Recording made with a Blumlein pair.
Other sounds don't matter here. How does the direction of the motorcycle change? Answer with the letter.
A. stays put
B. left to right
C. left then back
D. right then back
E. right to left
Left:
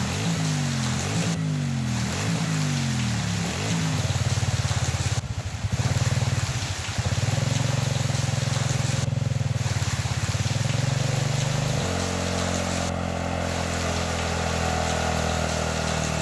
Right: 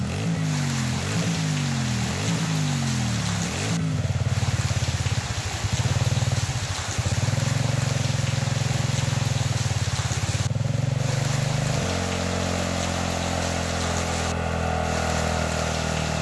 A.